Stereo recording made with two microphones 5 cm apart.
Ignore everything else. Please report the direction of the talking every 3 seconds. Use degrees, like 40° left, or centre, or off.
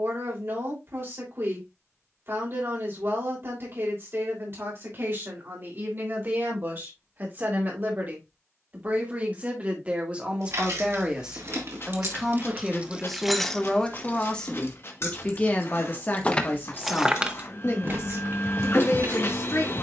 50° right, 50° right, 40° right, 30° right, 10° left, 40° left, 60° left.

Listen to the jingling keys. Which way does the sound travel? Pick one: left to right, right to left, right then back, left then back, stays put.
left then back.